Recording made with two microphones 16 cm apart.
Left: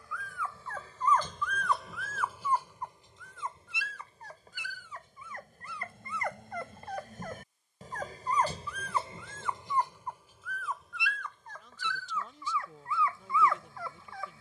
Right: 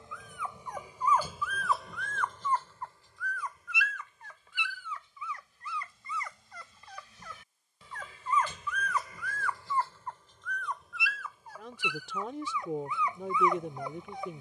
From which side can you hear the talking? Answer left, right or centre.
right.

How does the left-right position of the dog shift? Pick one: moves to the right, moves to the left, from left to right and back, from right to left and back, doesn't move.
from right to left and back.